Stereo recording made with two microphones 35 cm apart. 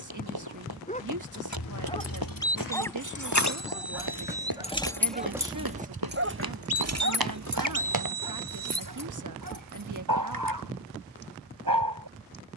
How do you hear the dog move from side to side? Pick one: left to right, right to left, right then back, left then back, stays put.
left to right.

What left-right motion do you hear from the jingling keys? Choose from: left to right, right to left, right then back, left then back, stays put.
left to right.